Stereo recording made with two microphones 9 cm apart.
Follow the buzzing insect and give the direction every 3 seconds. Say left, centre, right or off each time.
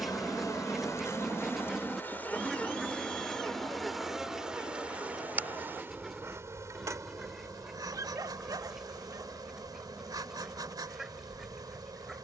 left, centre, right, right.